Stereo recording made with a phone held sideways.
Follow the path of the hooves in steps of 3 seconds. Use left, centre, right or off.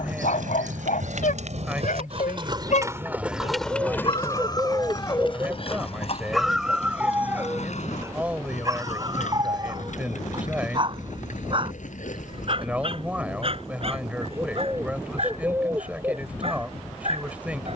right, left, left, left, left, off.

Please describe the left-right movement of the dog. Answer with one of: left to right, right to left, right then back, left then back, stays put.
left to right.